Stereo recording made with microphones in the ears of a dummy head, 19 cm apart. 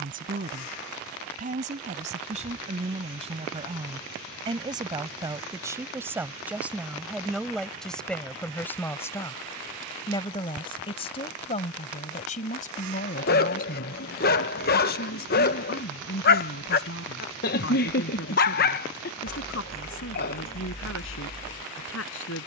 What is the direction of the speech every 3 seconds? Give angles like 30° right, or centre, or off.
40° right, 20° right, centre, 20° left, 40° left, 60° left, 60° left, 70° left.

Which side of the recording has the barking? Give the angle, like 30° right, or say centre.
50° left.